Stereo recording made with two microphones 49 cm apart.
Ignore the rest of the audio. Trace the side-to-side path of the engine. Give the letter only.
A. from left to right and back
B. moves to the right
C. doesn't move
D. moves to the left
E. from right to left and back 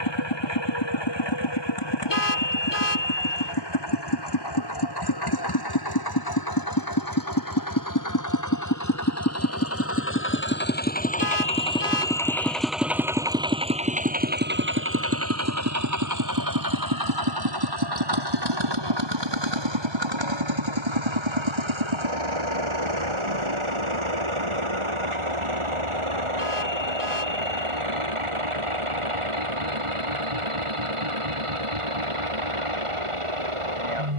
B.